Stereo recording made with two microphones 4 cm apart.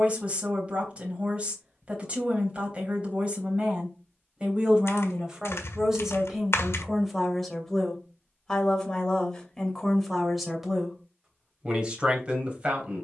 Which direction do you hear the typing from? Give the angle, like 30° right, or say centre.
70° left.